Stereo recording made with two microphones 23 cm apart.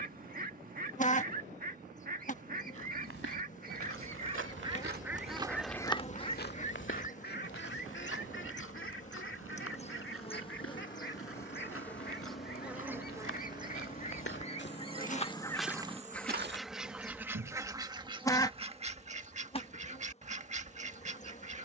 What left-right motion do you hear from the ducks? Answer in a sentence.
You can hear the ducks move from right to left and back again.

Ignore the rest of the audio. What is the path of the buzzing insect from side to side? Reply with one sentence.
In this clip you hear the buzzing insect go right and come back.